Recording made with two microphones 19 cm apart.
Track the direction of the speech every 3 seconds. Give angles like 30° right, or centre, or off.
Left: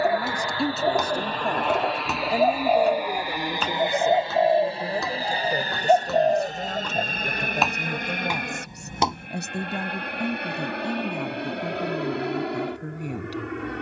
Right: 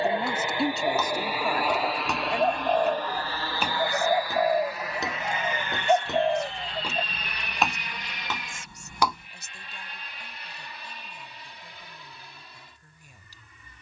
10° left, 50° left, 60° left, 70° left, 70° left.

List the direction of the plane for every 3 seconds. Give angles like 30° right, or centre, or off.
10° right, 20° left, 40° left, 60° left, 60° left.